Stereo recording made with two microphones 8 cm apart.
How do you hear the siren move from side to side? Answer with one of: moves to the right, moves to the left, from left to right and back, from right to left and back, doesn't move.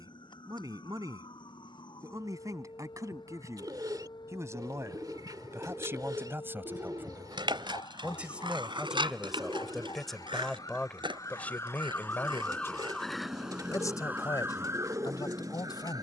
moves to the right.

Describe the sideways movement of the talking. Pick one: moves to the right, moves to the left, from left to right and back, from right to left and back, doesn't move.
moves to the left.